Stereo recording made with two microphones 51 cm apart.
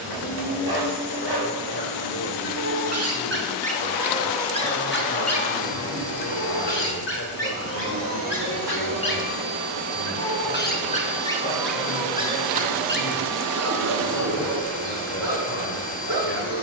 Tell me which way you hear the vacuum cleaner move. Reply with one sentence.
You can hear the vacuum cleaner travel towards the left.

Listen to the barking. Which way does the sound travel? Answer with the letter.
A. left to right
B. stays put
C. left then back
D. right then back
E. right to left
C.